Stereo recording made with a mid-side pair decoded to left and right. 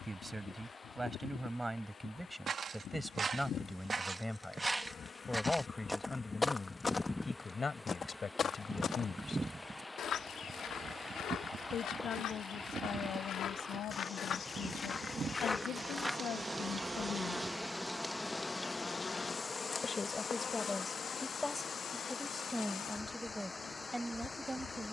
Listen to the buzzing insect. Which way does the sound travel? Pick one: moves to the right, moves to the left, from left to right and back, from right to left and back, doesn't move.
from left to right and back.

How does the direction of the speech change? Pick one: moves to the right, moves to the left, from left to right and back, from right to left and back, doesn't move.
from right to left and back.